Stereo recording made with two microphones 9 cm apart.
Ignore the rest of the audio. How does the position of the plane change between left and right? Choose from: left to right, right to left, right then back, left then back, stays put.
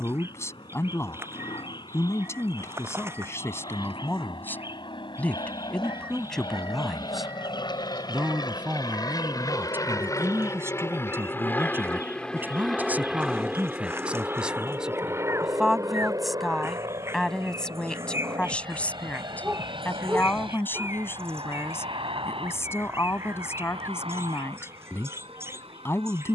left to right.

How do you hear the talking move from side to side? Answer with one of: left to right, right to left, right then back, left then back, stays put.
right then back.